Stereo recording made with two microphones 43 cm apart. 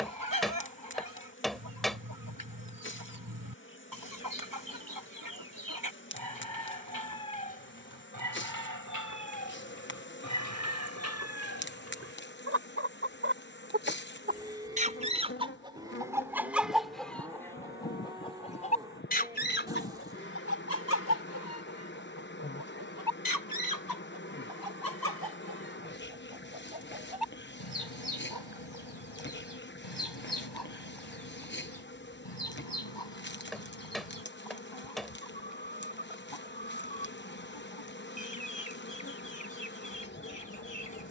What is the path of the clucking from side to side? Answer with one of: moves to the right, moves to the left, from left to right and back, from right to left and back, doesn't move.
moves to the left.